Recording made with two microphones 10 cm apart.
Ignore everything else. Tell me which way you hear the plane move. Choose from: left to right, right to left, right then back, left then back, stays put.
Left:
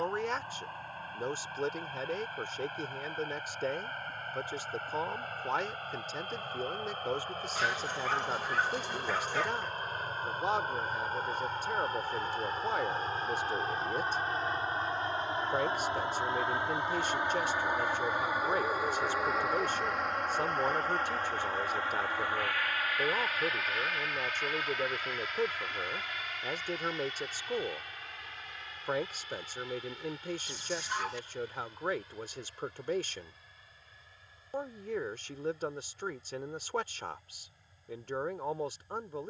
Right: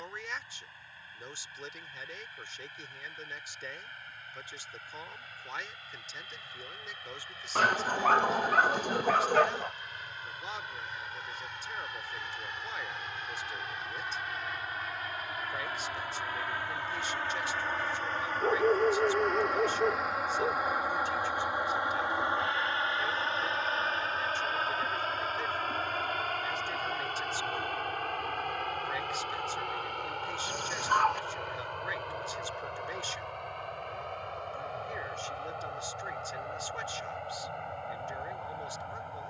left to right.